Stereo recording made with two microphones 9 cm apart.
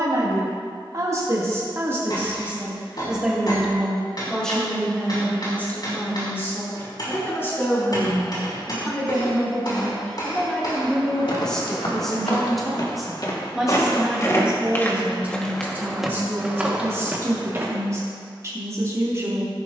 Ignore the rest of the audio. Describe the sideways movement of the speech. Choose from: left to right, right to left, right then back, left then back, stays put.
left then back.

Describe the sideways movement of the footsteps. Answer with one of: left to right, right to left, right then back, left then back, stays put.
left to right.